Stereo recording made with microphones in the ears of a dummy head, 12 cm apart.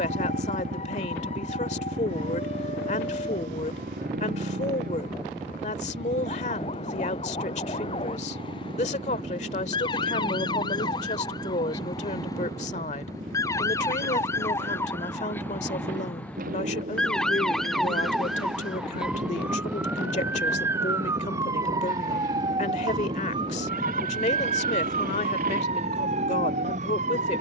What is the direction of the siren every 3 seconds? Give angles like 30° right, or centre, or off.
50° left, 50° left, 40° left, 30° left, 20° left, 10° left, 10° right, 30° right, 50° right.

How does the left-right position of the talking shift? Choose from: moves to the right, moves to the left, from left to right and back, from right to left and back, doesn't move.
doesn't move.